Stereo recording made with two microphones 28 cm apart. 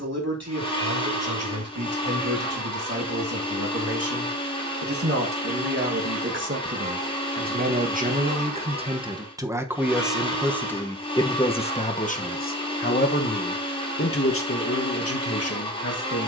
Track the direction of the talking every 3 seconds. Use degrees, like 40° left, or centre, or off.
60° right, 50° right, 30° right, centre, 40° left, 60° left.